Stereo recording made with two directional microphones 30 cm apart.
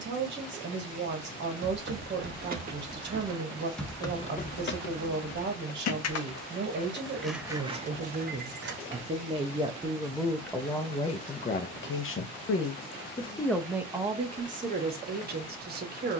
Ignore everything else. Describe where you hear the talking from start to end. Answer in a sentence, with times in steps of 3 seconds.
You can hear the talking on the right from 0 s, in the centre from 9 s and on the right from 15 s.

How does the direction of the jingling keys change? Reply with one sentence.
In this clip you hear the jingling keys go left and come back.